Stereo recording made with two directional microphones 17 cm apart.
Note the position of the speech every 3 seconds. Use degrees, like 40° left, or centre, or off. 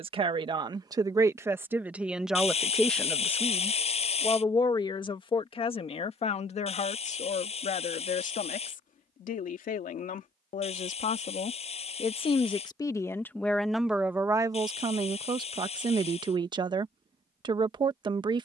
10° right, 20° left, 40° left, 50° left, centre, 30° right.